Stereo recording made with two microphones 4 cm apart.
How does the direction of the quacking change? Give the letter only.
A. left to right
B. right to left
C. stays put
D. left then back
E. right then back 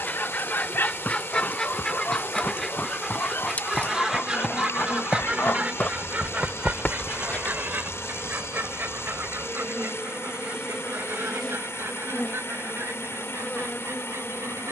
A.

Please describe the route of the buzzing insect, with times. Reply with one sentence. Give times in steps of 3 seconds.
In this clip you hear the buzzing insect on the left from 0 s, in the centre from 6 s and on the left from 12 s.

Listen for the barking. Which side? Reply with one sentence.
You can hear the barking on the left.